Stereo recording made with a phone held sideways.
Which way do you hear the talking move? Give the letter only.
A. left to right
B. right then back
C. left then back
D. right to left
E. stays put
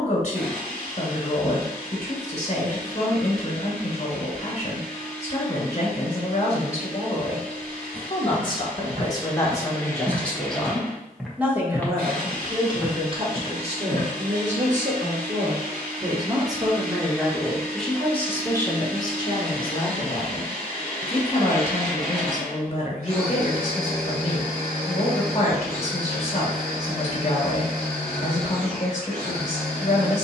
B.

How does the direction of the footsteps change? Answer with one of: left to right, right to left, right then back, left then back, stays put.
left then back.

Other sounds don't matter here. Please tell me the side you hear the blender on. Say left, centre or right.
right.